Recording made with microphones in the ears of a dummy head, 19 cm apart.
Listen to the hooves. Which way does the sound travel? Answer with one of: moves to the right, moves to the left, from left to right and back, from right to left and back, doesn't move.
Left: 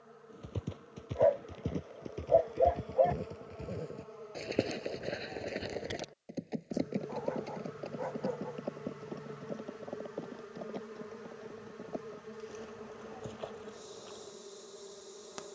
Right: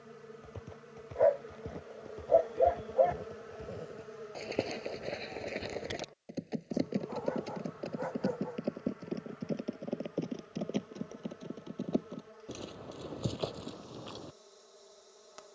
moves to the right.